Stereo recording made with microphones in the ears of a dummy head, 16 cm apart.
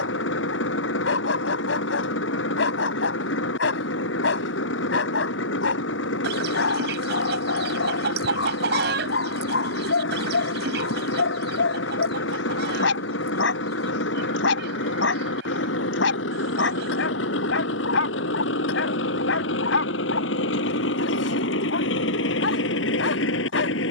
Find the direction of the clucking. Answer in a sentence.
You can hear the clucking on the right.